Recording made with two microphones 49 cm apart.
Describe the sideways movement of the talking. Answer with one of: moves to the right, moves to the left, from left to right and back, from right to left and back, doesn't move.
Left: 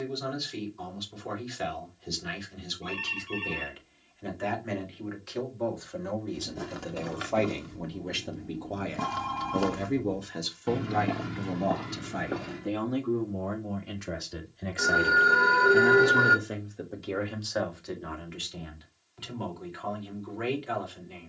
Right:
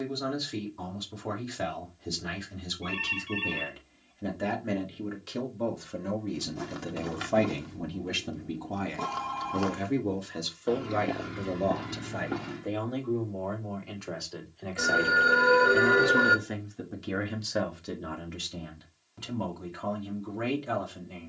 from right to left and back.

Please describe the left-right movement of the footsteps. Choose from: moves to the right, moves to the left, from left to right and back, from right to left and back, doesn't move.
from right to left and back.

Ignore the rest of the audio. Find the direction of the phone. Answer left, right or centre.
right.